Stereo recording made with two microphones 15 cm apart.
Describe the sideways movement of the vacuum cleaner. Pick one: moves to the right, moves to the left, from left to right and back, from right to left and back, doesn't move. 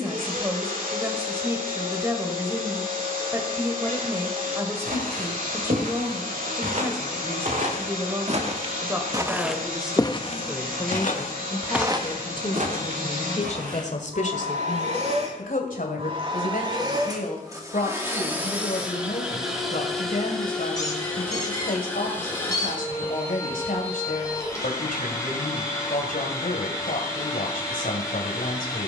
moves to the left.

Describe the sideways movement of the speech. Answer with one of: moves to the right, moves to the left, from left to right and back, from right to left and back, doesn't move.
moves to the left.